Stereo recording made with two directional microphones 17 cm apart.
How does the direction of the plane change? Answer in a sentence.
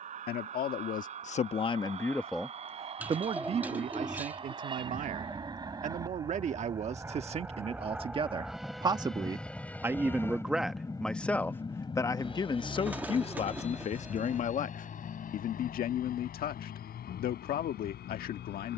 In this clip you hear the plane move to the left.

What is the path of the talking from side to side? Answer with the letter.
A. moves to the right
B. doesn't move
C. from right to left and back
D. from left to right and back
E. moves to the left
D.